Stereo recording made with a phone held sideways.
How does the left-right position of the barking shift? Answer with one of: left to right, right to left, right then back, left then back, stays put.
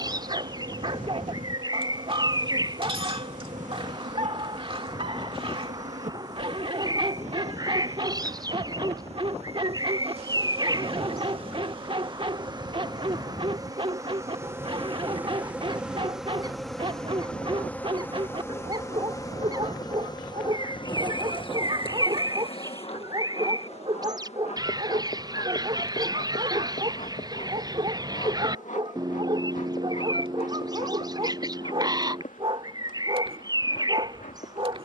stays put.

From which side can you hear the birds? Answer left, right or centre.
right.